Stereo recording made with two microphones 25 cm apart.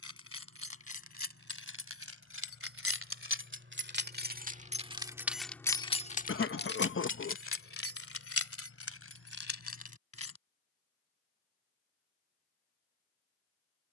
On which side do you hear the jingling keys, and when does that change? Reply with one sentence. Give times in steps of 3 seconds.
In this clip you hear the jingling keys on the right from 0 s, on the left from 6 s and not at all from 12 s.